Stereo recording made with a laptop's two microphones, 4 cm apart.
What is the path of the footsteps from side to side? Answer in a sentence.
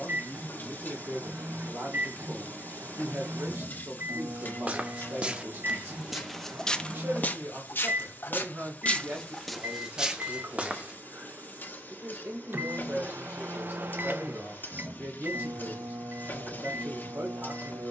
You can hear the footsteps move from right to left and back again.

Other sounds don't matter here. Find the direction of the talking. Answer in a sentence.
In this clip you hear the talking on the right.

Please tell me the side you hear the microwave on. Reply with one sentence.
You can hear the microwave on the right.